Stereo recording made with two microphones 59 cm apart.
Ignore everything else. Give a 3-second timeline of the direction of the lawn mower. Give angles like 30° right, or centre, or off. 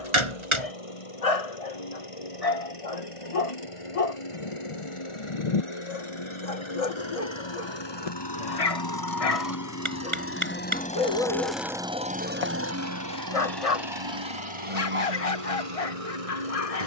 60° left, 60° left, 50° left, 20° left, 40° right, 70° right.